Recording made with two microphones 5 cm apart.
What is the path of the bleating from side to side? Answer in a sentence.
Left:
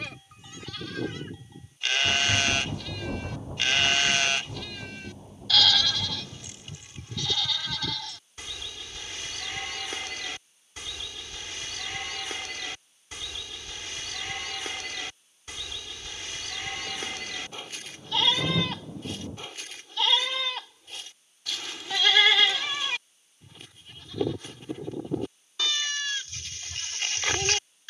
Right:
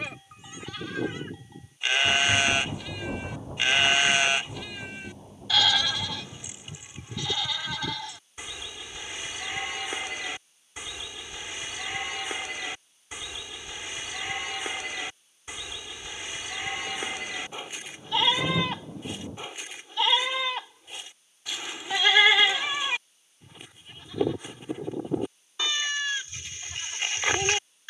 You can hear the bleating stay in one place.